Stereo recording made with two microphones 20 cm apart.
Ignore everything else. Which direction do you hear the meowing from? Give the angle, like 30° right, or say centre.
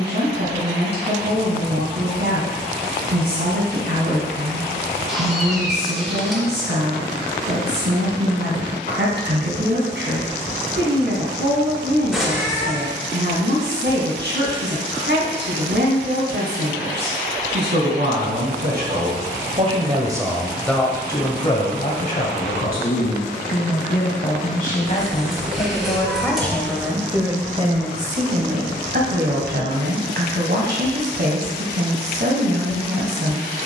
centre.